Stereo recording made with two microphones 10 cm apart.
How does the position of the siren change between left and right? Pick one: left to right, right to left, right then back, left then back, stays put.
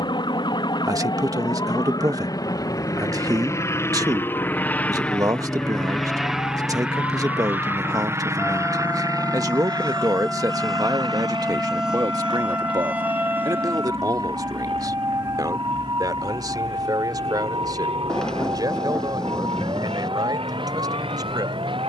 left to right.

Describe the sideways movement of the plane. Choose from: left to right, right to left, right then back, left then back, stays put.
left to right.